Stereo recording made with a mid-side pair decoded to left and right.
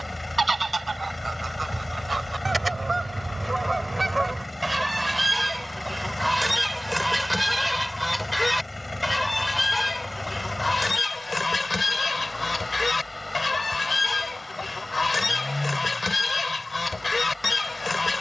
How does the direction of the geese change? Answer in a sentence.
You can hear the geese go from the right side to the left.